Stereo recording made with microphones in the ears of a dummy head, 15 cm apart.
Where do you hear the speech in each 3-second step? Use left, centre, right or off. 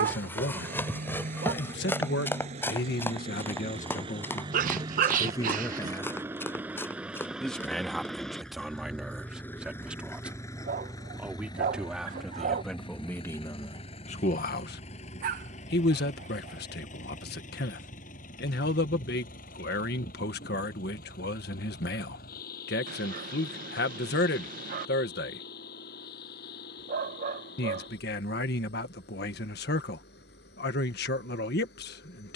left, left, centre, centre, left, left, left, left, left, left, left.